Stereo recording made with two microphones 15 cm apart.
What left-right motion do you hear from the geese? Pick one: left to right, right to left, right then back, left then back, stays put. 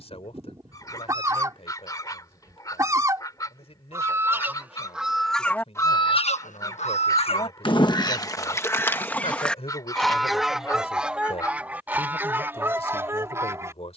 left then back.